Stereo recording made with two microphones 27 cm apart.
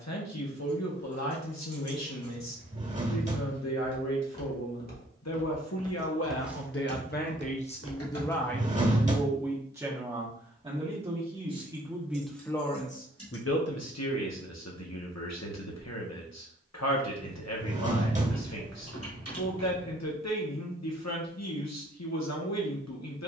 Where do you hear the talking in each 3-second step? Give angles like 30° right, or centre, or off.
80° left, 70° left, 30° left, 10° right, 50° left, 70° left, 70° left, 70° left.